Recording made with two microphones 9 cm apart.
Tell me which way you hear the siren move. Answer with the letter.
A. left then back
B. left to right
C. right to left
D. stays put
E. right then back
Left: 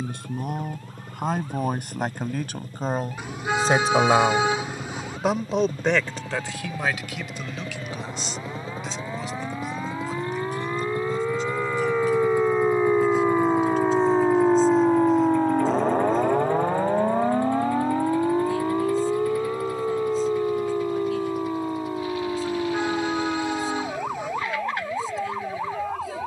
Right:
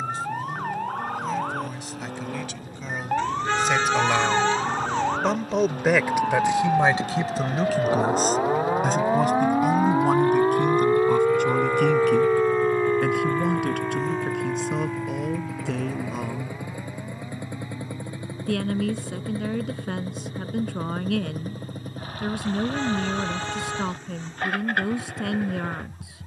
C.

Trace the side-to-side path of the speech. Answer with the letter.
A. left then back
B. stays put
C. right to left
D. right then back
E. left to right
E.